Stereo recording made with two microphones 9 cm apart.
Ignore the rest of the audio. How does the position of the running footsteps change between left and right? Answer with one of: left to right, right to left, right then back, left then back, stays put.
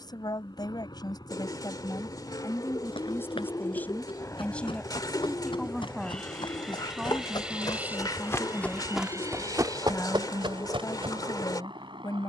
left to right.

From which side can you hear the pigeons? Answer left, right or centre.
left.